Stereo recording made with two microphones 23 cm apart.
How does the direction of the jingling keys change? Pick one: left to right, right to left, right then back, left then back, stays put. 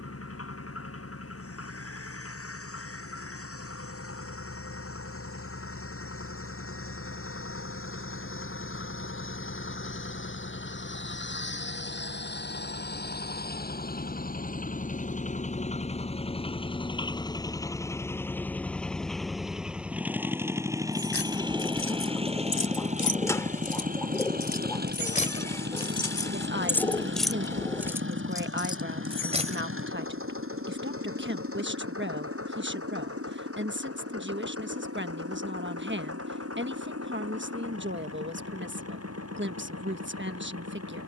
left to right.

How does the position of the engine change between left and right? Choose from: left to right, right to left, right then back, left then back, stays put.
left to right.